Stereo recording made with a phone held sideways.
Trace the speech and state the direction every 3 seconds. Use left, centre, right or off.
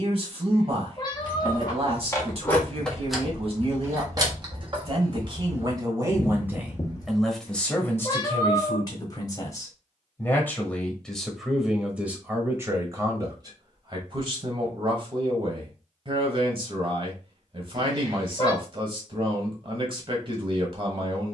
right, right, centre, centre, right, right, right.